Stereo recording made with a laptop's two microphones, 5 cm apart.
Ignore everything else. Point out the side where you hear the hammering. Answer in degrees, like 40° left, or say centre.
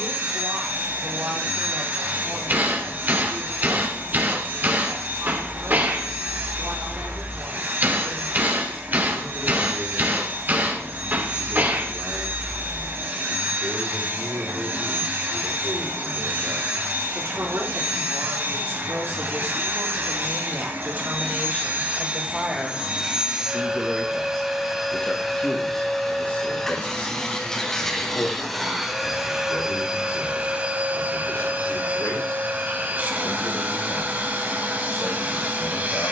40° right.